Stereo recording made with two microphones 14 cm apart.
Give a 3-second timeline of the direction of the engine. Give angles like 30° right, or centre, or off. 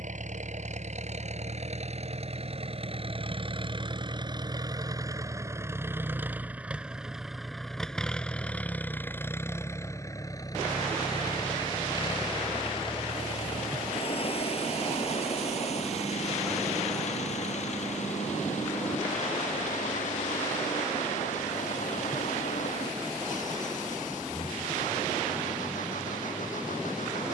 50° right, 30° right, centre, 20° left, 40° left, 50° left, 60° left, 60° left, 60° left.